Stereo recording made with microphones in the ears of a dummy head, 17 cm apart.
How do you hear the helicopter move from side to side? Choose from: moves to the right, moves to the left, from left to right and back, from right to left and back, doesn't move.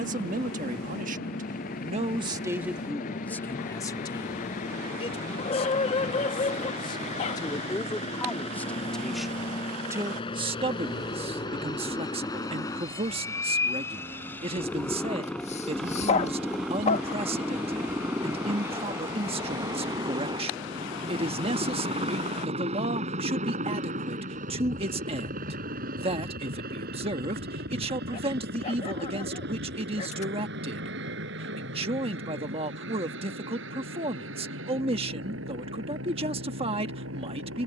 moves to the right.